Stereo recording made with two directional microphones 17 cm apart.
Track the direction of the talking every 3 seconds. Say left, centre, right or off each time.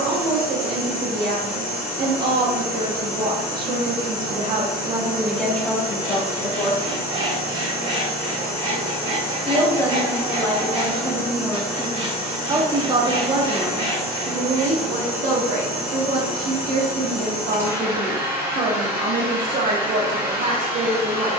right, right, left, centre, right, right, right.